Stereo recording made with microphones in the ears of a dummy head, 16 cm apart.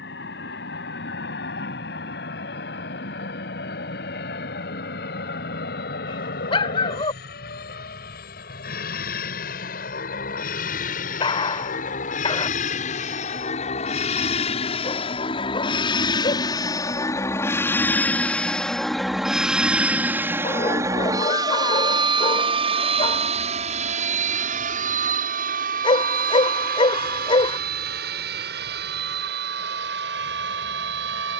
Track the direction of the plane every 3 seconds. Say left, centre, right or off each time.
left, left, left, left, left, left, centre, right, right, right, right.